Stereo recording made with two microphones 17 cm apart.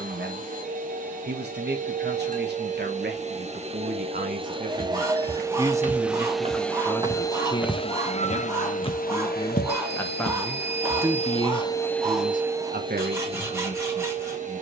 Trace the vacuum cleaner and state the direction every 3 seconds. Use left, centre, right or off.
right, right, left, left, right.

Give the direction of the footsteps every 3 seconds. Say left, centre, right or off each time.
off, right, centre, left, off.